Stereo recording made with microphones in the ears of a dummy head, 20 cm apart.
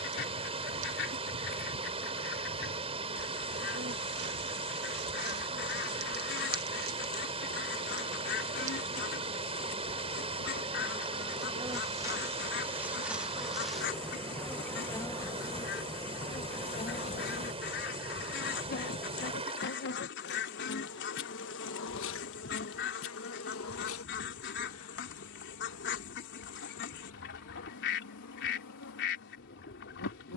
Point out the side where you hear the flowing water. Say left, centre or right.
right.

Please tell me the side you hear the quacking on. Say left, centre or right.
left.